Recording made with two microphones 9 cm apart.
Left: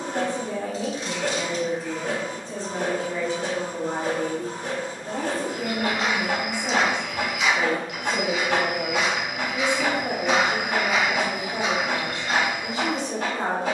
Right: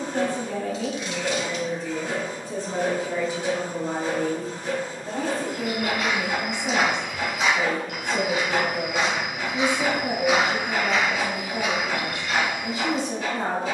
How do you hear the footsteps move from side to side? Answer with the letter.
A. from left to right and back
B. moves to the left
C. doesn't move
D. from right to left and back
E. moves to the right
A.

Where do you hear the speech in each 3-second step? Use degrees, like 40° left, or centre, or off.
10° left, centre, 20° left, 30° left, 30° left.